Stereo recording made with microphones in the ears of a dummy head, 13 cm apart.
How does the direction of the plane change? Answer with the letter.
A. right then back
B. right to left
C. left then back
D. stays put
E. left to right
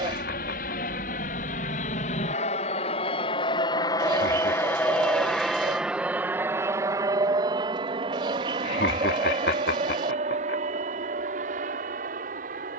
E.